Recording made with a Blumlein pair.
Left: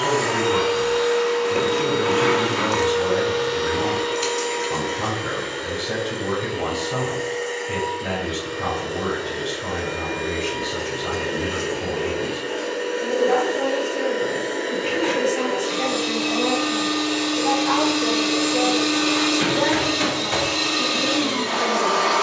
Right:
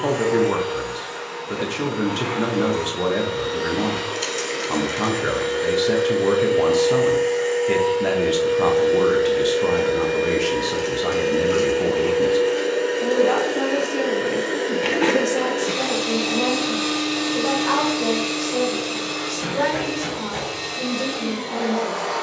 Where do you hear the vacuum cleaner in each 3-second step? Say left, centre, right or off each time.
left, centre, right, right, right, centre, left, left.